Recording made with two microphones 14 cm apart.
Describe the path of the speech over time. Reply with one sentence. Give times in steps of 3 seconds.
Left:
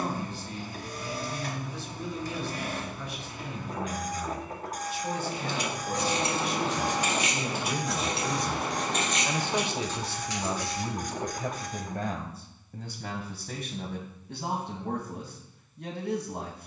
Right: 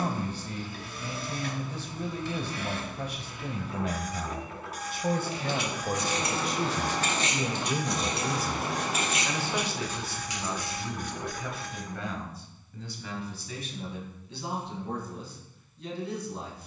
You can hear the speech on the right from 0 s and on the left from 9 s.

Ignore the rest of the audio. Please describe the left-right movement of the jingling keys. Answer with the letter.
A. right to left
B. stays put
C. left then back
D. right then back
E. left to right
E.